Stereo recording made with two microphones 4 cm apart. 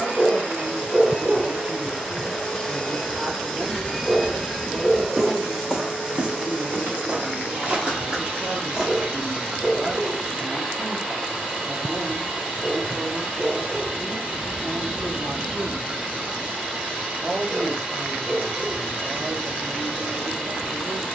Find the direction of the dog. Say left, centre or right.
centre.